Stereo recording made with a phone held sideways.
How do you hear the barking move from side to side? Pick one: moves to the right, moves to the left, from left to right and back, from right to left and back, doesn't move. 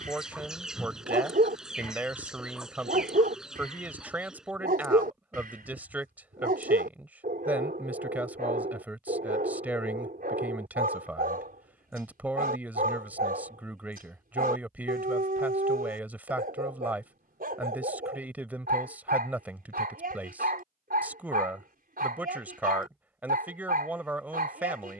doesn't move.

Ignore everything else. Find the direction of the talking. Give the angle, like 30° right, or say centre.
10° right.